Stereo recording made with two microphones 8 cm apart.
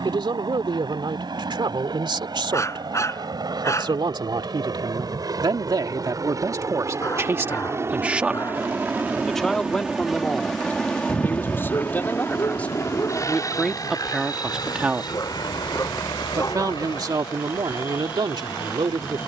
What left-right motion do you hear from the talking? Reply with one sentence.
In this clip you hear the talking move from right to left and back again.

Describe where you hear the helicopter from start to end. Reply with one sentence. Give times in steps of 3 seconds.
In this clip you hear the helicopter on the right from 0 s, in the centre from 9 s and on the left from 12 s.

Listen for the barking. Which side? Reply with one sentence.
You can hear the barking on the left.